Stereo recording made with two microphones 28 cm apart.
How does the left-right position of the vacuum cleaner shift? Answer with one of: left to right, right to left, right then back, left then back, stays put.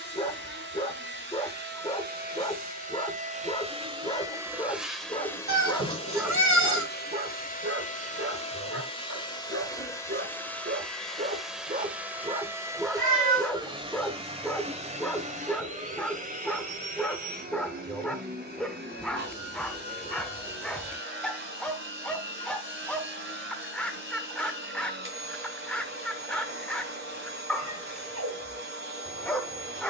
left then back.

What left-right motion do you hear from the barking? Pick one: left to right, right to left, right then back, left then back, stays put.
right then back.